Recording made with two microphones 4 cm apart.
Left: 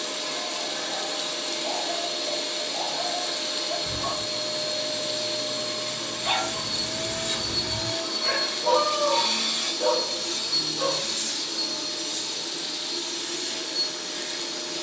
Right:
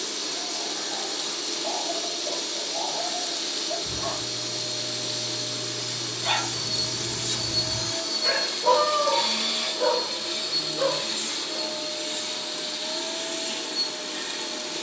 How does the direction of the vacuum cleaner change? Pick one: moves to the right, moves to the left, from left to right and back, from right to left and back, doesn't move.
moves to the right.